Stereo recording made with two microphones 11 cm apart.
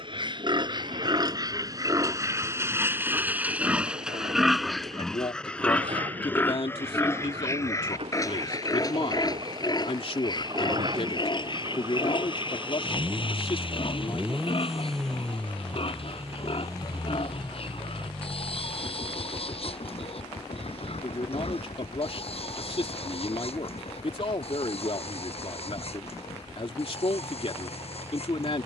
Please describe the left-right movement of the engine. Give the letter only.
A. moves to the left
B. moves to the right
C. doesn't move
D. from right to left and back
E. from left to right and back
A.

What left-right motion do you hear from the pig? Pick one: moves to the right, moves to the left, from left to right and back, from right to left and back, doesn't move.
moves to the left.